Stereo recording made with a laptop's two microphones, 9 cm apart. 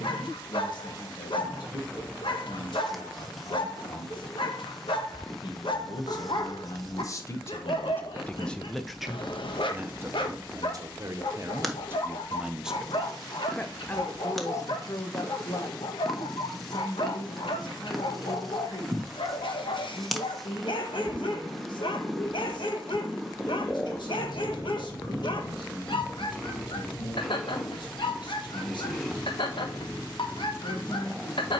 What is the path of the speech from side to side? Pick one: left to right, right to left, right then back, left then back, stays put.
right then back.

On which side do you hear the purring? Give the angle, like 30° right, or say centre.
centre.